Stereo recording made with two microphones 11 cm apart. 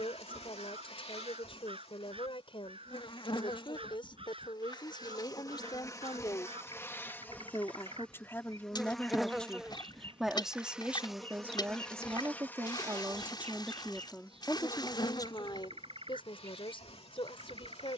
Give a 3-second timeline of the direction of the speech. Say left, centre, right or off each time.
left, left, left, centre, centre, left.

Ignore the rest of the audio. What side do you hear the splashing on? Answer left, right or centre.
left.